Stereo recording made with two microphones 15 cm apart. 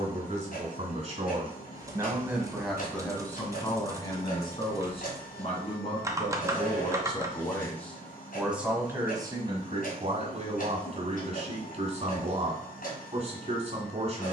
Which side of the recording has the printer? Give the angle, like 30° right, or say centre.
60° left.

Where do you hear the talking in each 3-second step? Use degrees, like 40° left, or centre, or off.
30° right, 30° left, 20° left, 40° right, 40° right.